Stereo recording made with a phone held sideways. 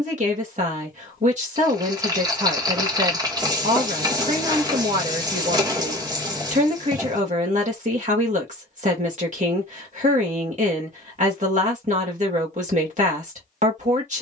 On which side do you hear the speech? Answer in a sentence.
In this clip you hear the speech on the right.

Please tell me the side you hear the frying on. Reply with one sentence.
In this clip you hear the frying on the right.